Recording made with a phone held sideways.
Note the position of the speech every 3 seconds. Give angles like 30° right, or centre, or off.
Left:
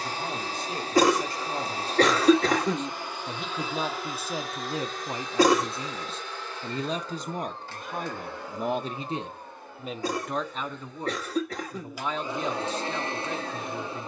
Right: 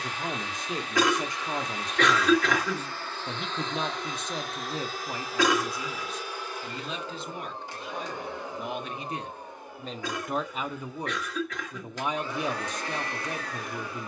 20° right, 10° left, 40° left, centre, 10° right.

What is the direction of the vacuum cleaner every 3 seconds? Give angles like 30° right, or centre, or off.
30° left, centre, 10° right, 10° right, 20° left.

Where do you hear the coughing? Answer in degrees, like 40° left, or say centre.
40° left.